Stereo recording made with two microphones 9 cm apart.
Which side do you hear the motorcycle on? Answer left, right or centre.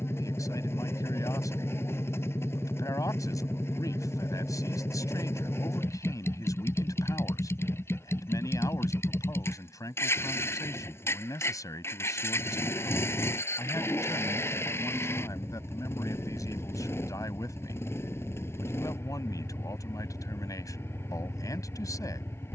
left.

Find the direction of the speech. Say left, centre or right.
left.